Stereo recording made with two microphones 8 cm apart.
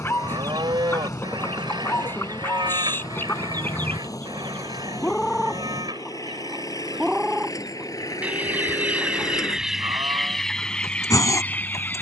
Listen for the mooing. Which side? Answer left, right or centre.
right.